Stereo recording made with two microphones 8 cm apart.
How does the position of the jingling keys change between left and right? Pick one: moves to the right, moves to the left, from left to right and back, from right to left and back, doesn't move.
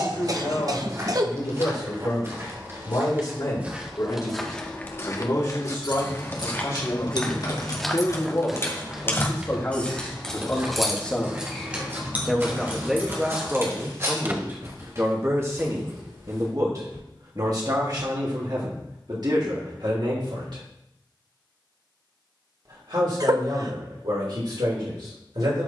moves to the right.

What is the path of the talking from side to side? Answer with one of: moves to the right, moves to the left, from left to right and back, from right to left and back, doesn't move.
moves to the right.